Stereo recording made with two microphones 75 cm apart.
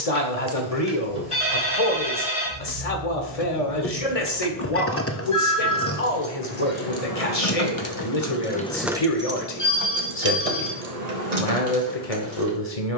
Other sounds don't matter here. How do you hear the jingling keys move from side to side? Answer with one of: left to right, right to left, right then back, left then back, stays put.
left then back.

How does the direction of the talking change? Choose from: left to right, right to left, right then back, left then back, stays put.
stays put.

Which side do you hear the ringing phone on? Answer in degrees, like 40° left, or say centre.
40° left.